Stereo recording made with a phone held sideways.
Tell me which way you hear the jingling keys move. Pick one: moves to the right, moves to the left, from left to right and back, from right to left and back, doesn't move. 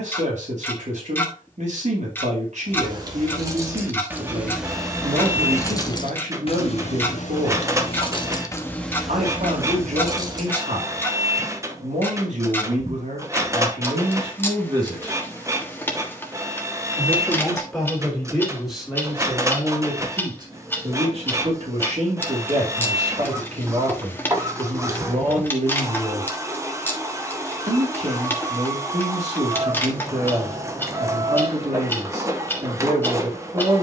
from right to left and back.